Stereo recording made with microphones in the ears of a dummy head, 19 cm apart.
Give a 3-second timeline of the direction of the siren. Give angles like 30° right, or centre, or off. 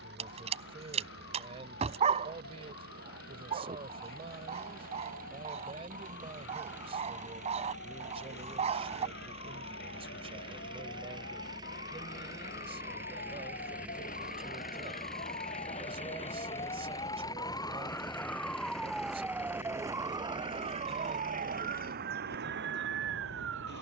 60° left, 60° left, 60° left, 50° left, 40° left, 30° left, 10° right, 50° right.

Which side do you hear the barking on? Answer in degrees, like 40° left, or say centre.
30° right.